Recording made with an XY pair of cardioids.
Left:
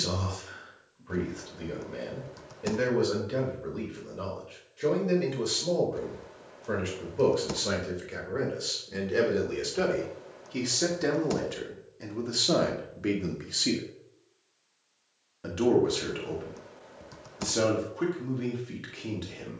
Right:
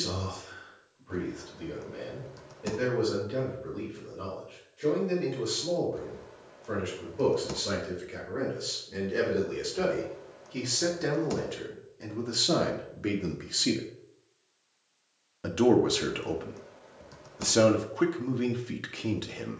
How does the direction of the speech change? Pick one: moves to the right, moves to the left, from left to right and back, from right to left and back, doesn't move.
moves to the right.